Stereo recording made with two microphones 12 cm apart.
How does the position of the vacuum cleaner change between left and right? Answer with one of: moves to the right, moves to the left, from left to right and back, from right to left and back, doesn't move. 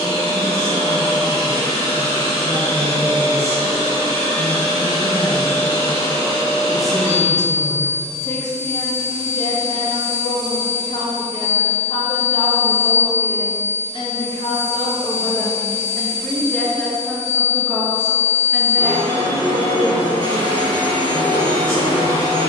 doesn't move.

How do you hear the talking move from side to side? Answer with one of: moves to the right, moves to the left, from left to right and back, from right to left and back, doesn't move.
from right to left and back.